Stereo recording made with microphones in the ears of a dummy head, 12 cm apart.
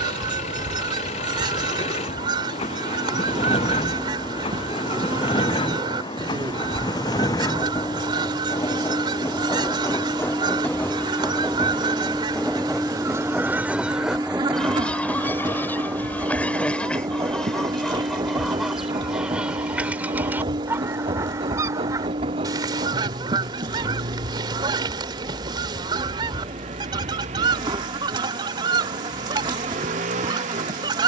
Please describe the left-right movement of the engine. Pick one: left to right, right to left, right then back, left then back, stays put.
left to right.